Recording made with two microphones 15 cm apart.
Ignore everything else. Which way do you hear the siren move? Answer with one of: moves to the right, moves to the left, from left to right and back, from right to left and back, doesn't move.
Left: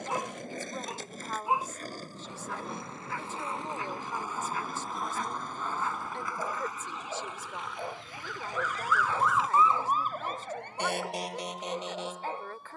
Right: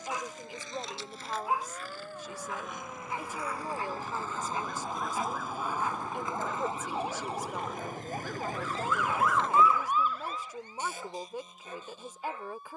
moves to the left.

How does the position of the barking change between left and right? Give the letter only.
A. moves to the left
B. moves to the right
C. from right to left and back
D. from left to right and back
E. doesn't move
D.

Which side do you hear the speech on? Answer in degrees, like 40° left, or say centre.
10° right.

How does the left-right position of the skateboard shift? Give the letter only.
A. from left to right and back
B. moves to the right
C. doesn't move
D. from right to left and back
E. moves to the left
B.